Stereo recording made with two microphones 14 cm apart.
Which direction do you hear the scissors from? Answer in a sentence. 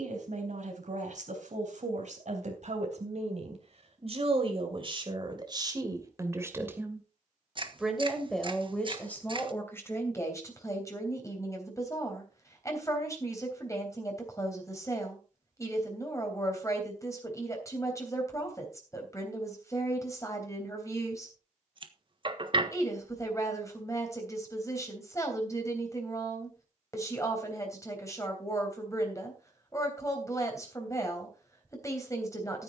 In this clip you hear the scissors on the right.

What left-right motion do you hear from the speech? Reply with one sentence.
You can hear the speech go from the right side to the left.